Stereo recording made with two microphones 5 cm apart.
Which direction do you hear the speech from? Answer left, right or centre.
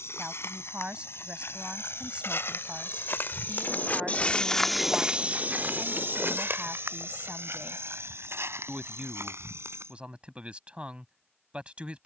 right.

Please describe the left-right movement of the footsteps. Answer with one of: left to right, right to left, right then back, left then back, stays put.
left to right.